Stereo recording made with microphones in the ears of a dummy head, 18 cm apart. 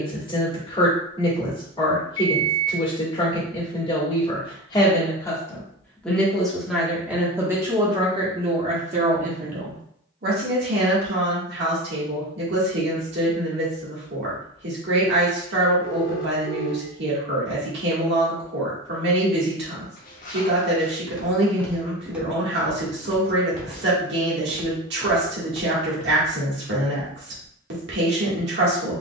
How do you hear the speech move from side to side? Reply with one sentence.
You can hear the speech travel towards the right.